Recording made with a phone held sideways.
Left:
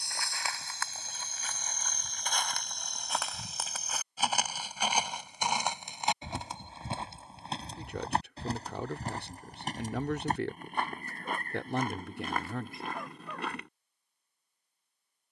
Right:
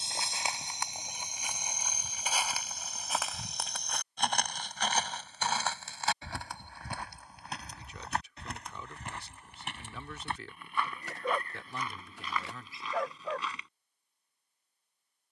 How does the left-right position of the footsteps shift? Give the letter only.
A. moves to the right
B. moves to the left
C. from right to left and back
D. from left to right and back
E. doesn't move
B.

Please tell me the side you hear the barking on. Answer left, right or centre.
right.